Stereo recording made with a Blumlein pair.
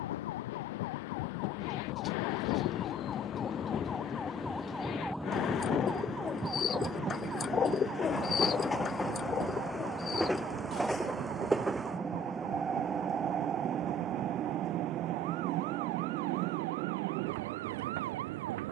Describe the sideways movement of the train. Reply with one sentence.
You can hear the train move from left to right.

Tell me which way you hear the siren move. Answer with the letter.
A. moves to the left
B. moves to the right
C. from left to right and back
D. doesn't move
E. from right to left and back
B.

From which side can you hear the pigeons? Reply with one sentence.
You can hear the pigeons on the left.